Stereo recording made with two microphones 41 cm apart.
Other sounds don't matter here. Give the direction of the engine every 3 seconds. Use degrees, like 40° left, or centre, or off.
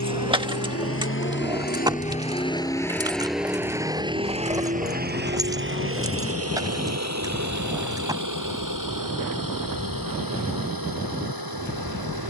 20° left, 20° right, 40° right, 60° right.